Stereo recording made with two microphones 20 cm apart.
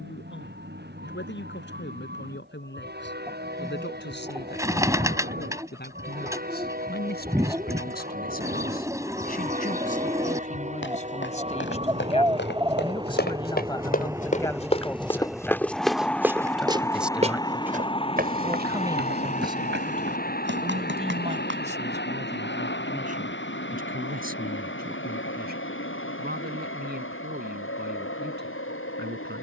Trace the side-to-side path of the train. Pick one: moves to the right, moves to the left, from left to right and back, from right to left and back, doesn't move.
moves to the left.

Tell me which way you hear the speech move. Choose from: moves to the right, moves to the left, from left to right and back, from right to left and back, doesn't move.
moves to the right.